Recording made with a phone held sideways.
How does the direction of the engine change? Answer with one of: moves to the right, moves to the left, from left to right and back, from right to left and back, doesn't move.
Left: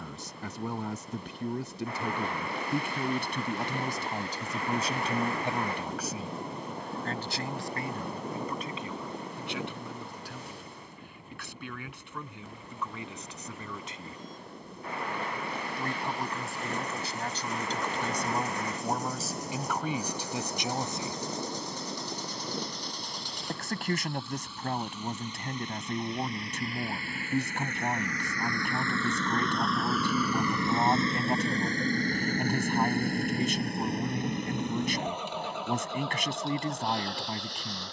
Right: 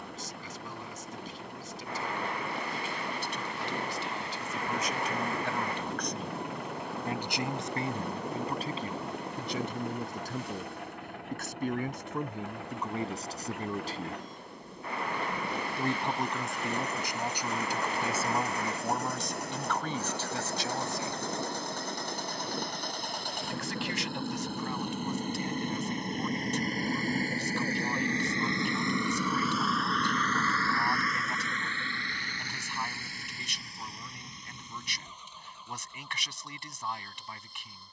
moves to the left.